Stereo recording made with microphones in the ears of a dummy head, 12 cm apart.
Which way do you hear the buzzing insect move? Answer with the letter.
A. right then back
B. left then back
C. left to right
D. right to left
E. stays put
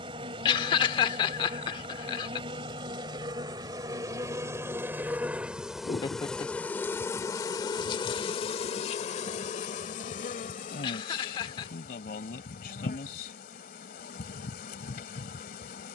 D.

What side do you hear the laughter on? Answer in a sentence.
In this clip you hear the laughter on the left.